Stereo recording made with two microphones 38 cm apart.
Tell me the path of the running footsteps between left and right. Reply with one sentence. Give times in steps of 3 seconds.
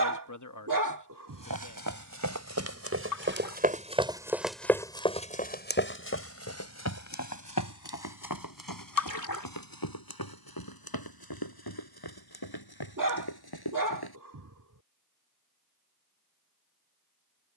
In this clip you hear the running footsteps on the right from 0 s, in the centre from 3 s, on the left from 6 s and not at all from 15 s.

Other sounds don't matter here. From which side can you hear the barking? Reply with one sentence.
You can hear the barking on the right.